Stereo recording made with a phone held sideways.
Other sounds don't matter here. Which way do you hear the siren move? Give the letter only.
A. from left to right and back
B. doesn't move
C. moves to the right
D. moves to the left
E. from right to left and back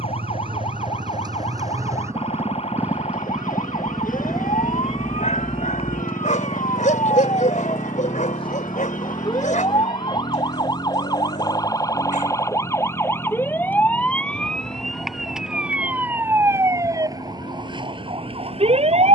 C.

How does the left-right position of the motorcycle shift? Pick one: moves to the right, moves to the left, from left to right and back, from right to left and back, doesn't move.
moves to the left.